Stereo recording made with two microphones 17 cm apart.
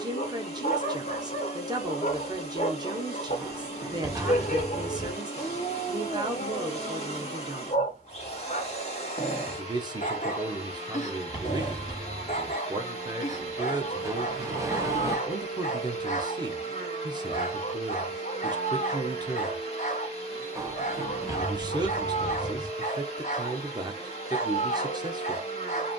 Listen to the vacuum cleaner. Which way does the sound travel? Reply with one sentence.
You can hear the vacuum cleaner stay in one place.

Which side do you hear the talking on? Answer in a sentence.
You can hear the talking on the right.